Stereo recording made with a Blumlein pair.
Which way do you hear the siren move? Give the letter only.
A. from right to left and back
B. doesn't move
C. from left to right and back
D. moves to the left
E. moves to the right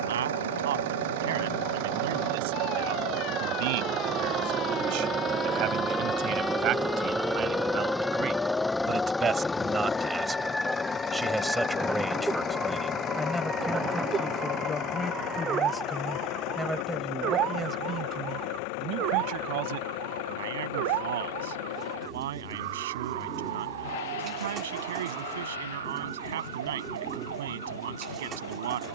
E.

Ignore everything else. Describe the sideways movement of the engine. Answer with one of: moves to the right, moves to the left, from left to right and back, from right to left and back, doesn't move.
moves to the left.